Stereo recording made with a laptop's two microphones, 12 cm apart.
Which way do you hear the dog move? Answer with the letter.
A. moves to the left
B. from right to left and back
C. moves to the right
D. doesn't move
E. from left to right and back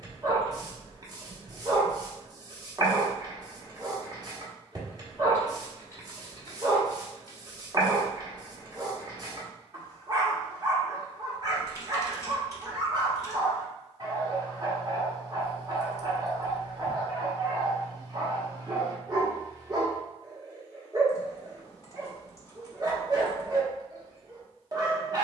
D.